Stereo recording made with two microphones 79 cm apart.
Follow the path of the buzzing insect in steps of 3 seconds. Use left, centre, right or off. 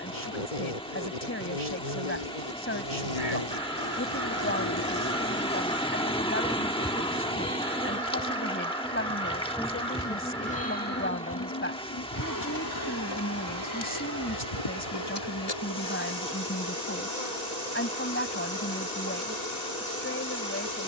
left, left, centre, centre, left, left, left.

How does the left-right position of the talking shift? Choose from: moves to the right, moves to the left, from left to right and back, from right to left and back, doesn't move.
doesn't move.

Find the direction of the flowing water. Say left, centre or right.
centre.